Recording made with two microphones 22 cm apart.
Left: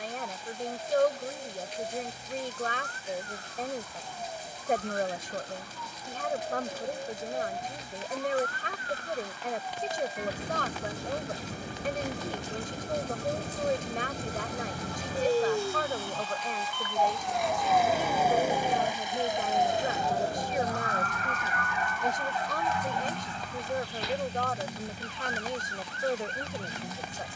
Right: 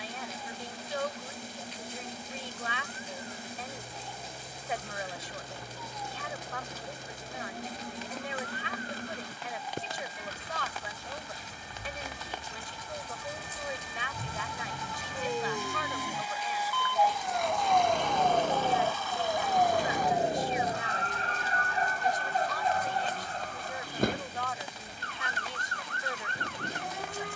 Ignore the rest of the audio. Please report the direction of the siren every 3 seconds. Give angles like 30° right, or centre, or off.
80° left, 70° left, 70° left, 60° left, 50° left, 20° left, 10° right, 40° right, 60° right.